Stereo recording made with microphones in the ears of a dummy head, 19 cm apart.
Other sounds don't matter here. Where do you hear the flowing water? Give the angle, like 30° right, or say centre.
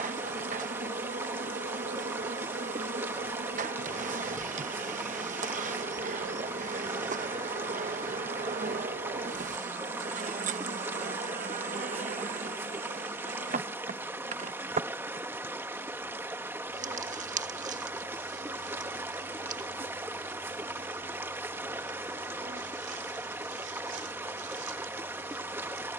10° right.